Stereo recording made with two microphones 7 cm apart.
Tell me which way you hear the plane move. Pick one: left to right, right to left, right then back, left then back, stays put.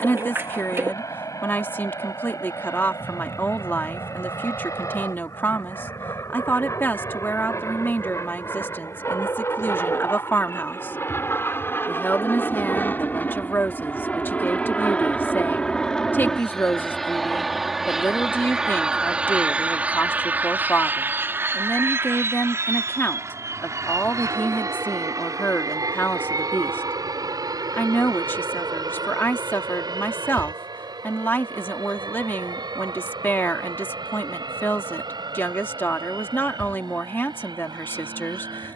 left to right.